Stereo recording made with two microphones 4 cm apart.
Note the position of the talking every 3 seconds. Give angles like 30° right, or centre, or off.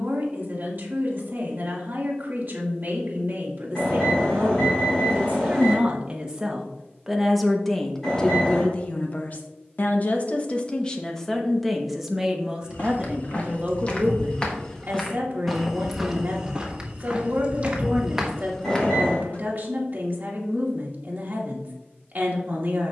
50° right, 40° right, 10° left, 20° left, 30° right, 40° right, 40° right, 40° right.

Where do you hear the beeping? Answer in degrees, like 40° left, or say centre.
10° left.